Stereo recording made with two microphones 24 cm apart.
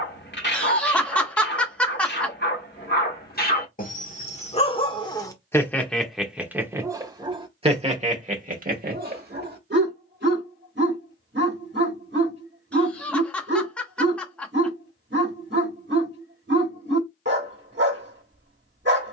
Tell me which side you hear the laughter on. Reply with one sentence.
In this clip you hear the laughter in the centre.